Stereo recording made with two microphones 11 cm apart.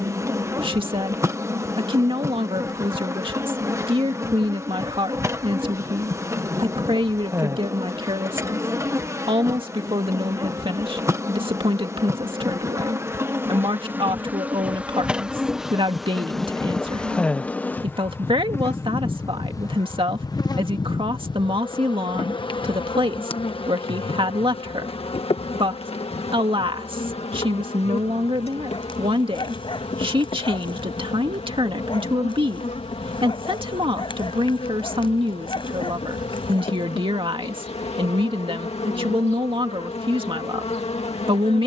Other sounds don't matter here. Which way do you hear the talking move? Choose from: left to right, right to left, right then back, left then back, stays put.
stays put.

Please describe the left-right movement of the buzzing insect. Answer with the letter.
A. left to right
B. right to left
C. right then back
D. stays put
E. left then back
B.